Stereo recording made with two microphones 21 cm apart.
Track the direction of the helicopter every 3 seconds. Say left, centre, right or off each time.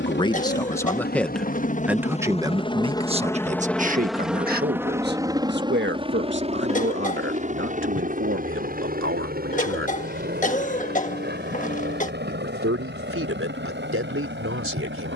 left, centre, right, right, right.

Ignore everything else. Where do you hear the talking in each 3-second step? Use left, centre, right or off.
centre, right, right, right, right.